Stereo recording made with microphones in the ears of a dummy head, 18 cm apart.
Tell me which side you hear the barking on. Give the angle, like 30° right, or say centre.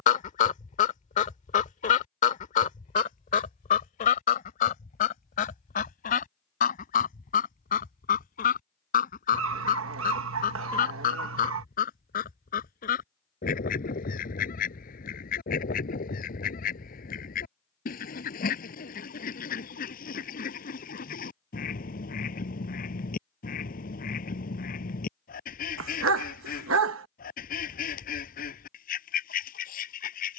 70° right.